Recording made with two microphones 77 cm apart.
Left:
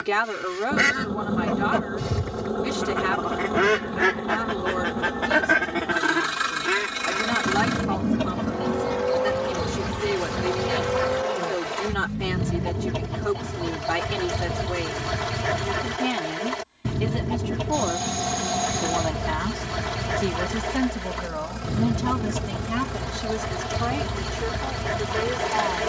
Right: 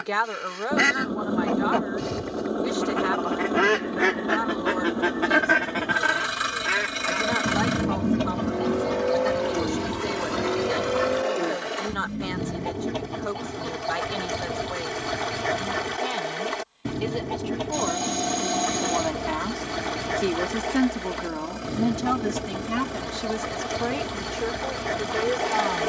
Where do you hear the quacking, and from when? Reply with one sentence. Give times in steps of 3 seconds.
In this clip you hear the quacking on the left from 0 s, in the centre from 6 s and on the left from 9 s.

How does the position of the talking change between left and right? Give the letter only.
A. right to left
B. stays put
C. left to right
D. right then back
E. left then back
C.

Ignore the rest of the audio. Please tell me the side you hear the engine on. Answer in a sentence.
In this clip you hear the engine on the left.